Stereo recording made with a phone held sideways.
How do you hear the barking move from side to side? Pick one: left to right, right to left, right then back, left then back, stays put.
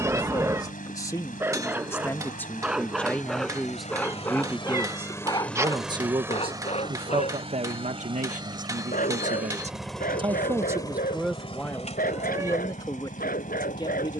right to left.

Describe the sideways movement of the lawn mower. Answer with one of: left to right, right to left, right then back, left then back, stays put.
right then back.